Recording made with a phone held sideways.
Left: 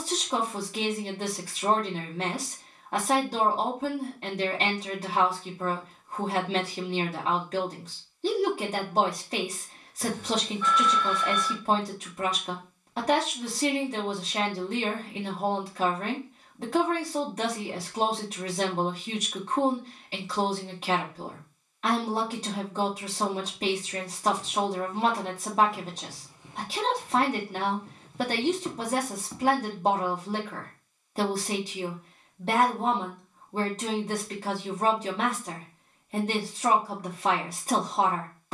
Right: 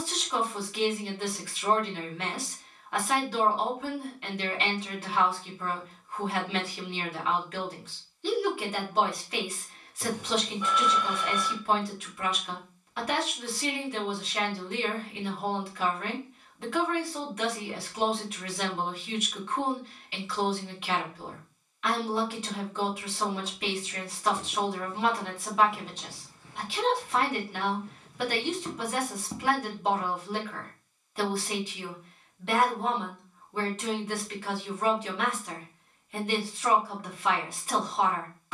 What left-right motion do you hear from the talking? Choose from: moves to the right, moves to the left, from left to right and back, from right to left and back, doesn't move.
doesn't move.